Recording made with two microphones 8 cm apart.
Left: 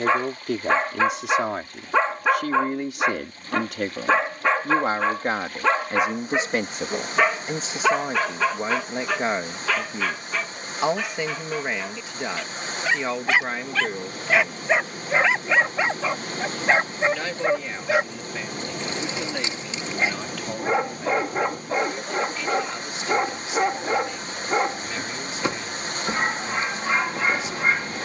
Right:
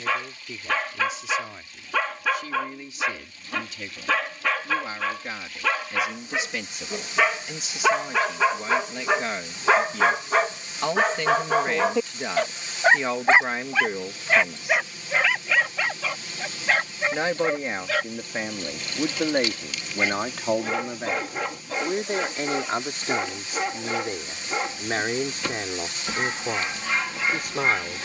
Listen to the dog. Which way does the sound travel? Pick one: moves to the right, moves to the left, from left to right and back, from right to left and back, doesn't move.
from left to right and back.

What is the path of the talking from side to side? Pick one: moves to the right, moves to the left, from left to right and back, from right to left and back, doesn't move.
moves to the right.